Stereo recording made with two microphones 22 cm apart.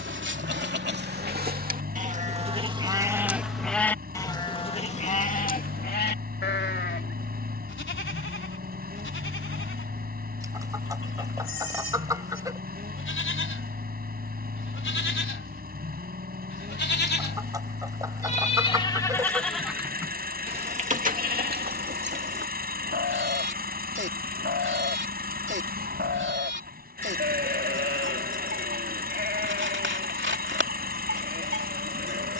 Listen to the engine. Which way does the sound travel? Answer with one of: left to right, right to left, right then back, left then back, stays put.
stays put.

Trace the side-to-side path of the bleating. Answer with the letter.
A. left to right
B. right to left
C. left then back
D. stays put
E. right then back
C.